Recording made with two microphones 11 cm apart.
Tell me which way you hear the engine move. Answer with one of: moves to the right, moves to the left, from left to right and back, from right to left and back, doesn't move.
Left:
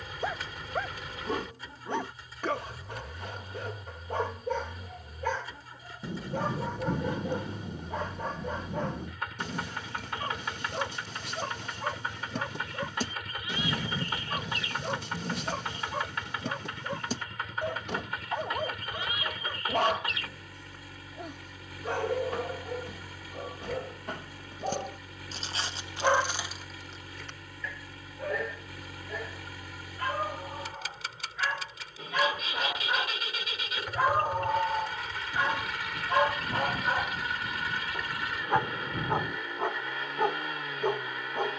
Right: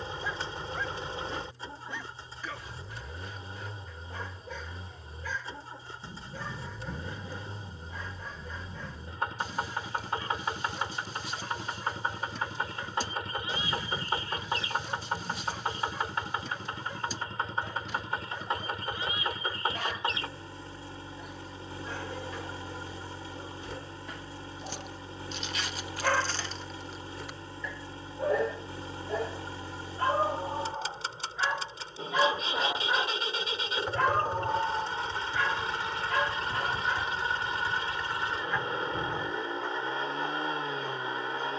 doesn't move.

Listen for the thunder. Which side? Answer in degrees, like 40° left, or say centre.
70° left.